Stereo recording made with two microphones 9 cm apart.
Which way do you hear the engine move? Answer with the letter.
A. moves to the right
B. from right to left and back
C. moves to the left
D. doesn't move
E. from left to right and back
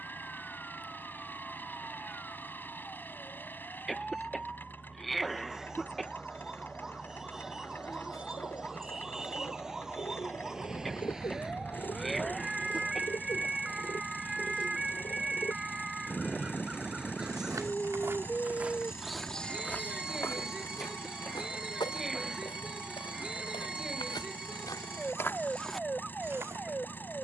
D.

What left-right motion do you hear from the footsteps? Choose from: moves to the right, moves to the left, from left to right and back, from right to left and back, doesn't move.
from right to left and back.